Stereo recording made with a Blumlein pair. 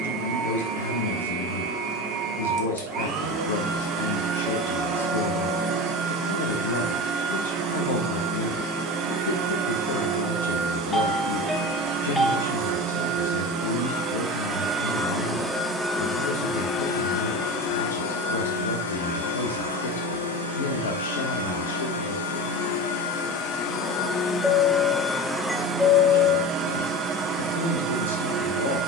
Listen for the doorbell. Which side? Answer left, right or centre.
centre.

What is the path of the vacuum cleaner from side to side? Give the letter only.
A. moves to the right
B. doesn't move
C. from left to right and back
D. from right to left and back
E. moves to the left
D.